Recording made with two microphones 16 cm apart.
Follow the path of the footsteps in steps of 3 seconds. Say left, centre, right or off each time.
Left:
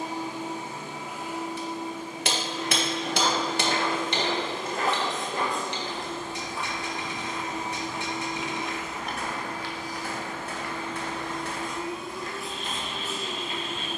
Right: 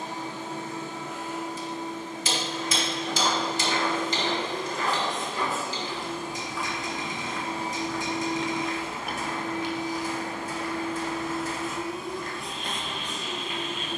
left, left, left, right, right.